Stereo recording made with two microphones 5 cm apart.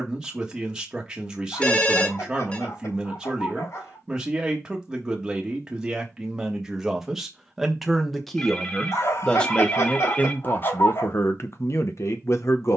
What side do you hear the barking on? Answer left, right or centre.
left.